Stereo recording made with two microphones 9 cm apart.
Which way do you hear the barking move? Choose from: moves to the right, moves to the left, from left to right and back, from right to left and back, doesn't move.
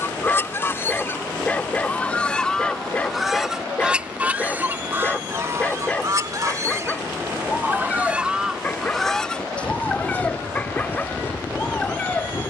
doesn't move.